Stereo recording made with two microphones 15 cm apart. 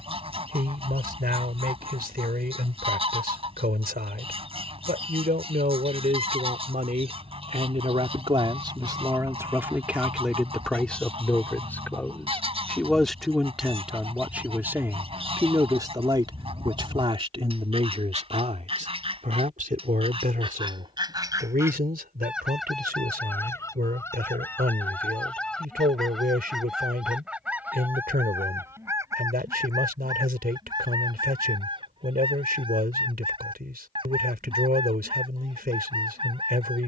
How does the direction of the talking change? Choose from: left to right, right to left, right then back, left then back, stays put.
left then back.